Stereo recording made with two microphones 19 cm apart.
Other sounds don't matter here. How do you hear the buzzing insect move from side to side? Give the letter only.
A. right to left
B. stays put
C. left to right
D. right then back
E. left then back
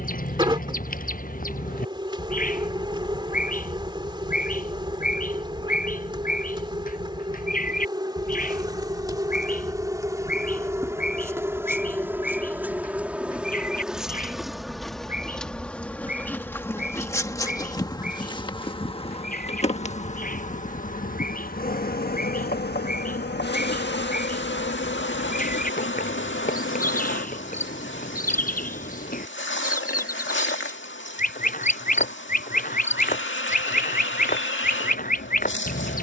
A.